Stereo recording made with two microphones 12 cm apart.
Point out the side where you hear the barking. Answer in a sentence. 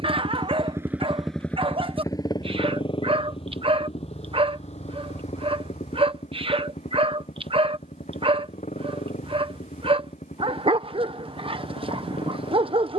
In this clip you hear the barking on the right.